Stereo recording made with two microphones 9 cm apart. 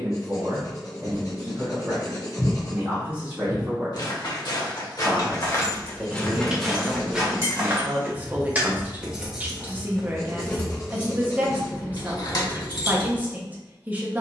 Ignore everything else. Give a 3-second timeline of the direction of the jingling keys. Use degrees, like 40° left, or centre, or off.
off, 40° left, 20° right, 20° left, 60° left.